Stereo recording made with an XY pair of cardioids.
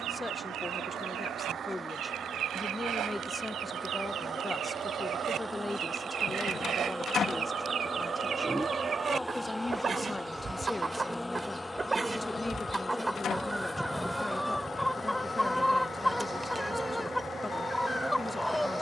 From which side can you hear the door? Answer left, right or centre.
left.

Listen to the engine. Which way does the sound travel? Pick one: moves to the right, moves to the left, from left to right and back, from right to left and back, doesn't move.
moves to the left.